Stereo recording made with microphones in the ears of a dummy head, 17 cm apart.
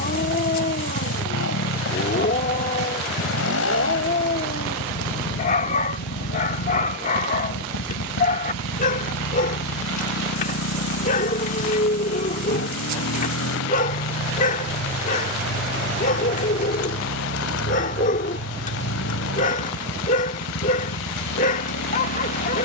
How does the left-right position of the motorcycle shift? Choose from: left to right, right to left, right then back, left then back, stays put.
stays put.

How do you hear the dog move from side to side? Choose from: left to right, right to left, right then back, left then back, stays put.
stays put.